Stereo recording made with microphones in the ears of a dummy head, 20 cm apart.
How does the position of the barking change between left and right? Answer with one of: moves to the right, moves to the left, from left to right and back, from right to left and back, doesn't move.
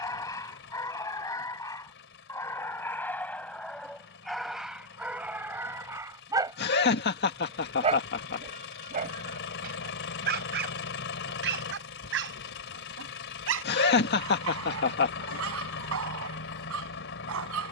moves to the right.